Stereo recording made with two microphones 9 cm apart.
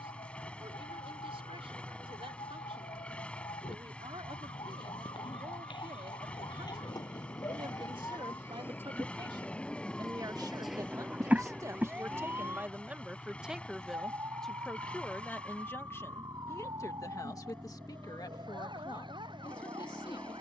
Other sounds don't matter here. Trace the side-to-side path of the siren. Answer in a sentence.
In this clip you hear the siren go from the left side to the right.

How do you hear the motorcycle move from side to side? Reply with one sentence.
You can hear the motorcycle stay put.